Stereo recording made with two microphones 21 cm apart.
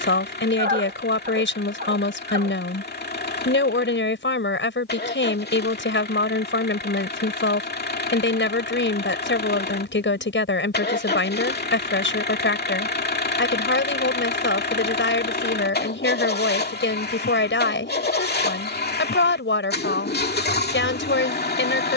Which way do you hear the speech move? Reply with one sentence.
In this clip you hear the speech stay in one place.